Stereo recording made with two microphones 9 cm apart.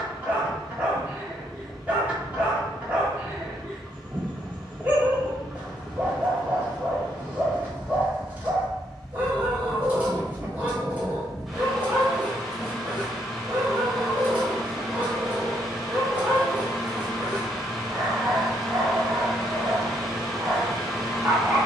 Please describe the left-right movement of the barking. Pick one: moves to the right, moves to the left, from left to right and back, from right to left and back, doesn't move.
doesn't move.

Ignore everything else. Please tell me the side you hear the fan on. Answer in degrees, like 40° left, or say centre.
centre.